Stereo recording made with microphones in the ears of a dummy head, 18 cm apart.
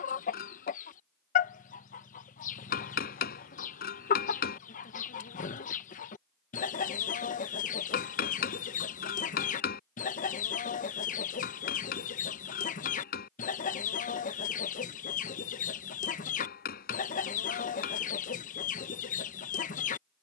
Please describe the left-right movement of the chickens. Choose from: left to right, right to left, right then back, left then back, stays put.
stays put.